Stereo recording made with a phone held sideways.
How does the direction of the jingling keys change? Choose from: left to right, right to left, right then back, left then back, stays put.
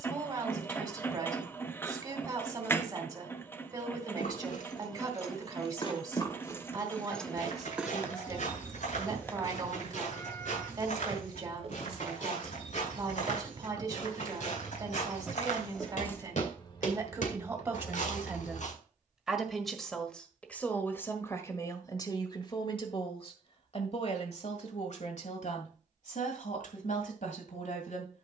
right then back.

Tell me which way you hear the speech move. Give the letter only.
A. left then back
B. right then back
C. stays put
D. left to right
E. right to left
E.